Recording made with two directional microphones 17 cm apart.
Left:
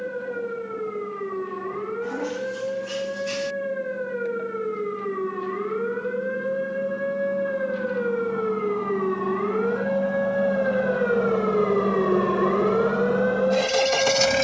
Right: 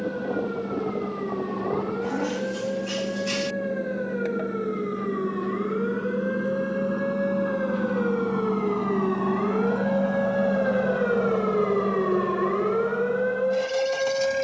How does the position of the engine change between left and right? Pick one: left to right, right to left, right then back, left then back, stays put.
right to left.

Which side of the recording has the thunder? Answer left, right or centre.
right.